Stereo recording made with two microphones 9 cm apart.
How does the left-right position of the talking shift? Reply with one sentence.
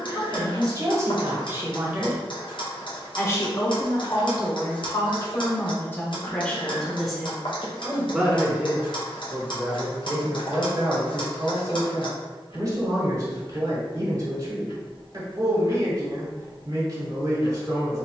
In this clip you hear the talking go left and come back.